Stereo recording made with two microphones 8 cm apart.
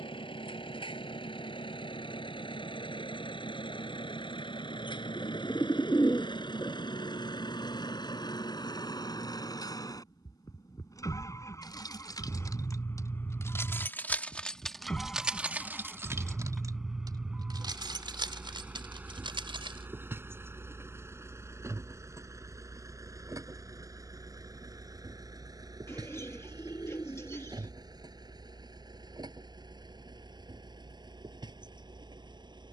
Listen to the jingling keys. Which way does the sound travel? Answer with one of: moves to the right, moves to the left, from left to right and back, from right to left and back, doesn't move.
moves to the right.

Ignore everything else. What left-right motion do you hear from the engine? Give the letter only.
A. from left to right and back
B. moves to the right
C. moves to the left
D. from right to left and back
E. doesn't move
B.